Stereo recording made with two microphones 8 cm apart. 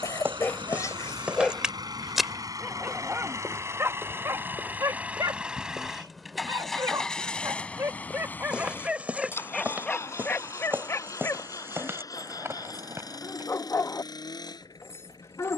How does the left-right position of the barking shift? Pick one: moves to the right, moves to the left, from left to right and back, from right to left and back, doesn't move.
from left to right and back.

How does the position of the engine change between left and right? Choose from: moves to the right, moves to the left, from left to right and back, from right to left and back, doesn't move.
moves to the left.